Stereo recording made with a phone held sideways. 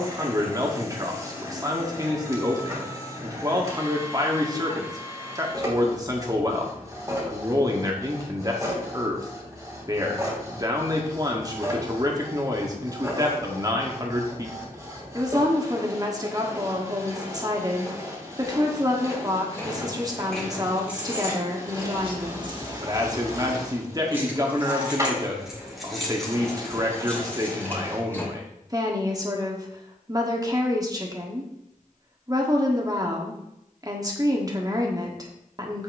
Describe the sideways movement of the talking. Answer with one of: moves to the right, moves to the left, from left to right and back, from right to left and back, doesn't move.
doesn't move.